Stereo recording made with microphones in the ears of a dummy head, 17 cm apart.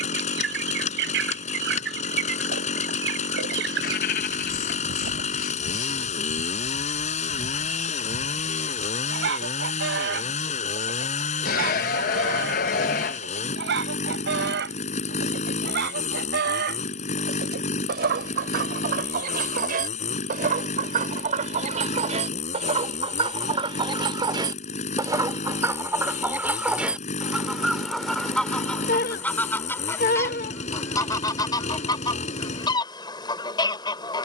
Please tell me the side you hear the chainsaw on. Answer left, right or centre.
left.